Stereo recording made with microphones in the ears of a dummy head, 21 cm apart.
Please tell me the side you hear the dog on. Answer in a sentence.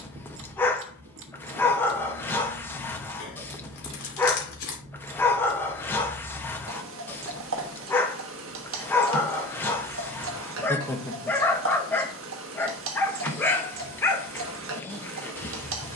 In this clip you hear the dog in the centre.